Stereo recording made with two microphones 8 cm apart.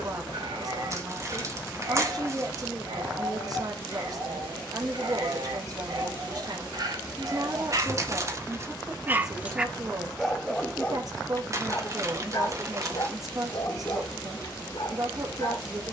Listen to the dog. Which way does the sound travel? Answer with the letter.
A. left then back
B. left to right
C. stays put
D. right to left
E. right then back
D.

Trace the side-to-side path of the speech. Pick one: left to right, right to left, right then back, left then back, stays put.
stays put.